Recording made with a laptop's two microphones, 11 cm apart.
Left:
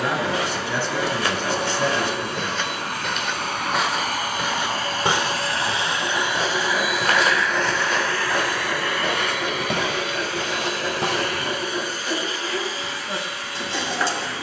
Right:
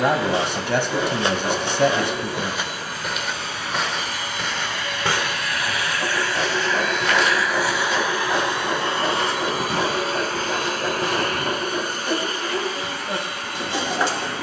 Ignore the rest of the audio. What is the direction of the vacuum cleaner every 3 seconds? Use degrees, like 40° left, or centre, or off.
70° left, 40° left, centre, 40° right, 50° right.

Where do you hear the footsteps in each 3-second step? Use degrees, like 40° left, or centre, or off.
20° right, 10° left, 50° left, 70° left, off.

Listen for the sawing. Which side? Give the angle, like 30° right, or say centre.
20° right.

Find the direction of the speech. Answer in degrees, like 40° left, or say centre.
70° right.